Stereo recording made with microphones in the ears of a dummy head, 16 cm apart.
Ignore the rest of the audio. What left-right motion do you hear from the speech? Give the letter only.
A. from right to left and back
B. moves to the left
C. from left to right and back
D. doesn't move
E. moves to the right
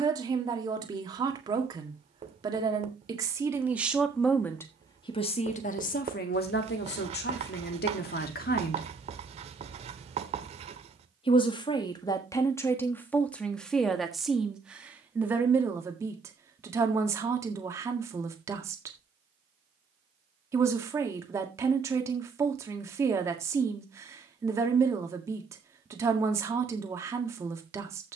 A.